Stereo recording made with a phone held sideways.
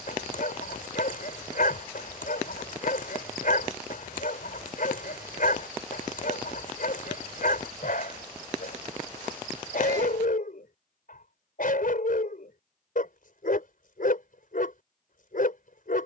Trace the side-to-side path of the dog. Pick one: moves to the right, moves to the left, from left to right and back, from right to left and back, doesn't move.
doesn't move.